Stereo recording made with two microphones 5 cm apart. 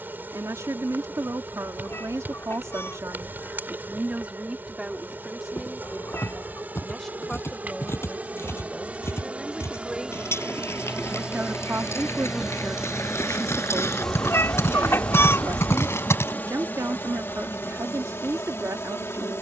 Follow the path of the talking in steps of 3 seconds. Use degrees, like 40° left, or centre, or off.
70° right, 30° right, centre, 20° right, 70° right, 70° right, 70° right.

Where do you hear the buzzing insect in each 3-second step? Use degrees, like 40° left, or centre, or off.
40° right, 40° right, 40° right, 20° right, centre, 40° left, 60° left.